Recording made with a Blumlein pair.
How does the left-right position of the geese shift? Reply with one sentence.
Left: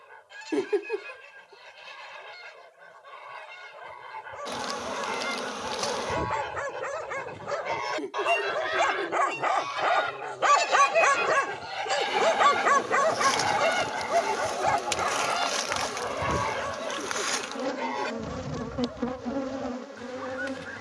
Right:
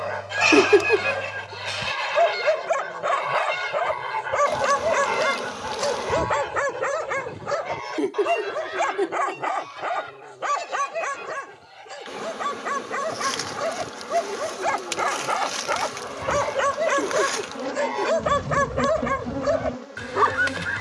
In this clip you hear the geese go left and come back.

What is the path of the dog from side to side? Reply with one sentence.
In this clip you hear the dog move from right to left and back again.